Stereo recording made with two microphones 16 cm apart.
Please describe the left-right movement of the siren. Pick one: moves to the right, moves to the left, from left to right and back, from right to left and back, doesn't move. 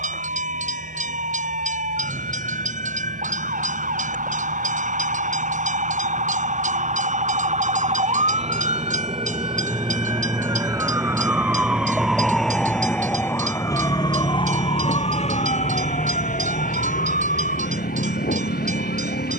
moves to the left.